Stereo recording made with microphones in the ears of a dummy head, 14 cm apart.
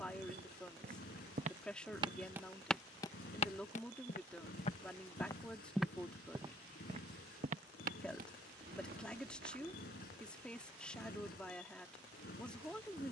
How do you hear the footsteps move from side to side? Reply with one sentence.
In this clip you hear the footsteps go left and come back.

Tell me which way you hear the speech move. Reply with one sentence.
In this clip you hear the speech stay in one place.